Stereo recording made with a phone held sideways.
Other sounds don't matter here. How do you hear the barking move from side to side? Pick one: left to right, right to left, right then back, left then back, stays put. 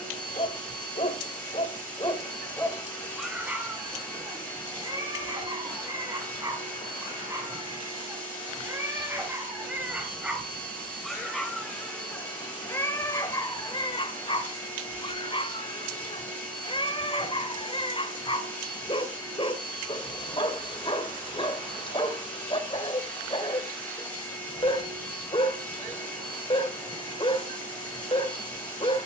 right then back.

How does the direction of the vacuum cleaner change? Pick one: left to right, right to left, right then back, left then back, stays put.
stays put.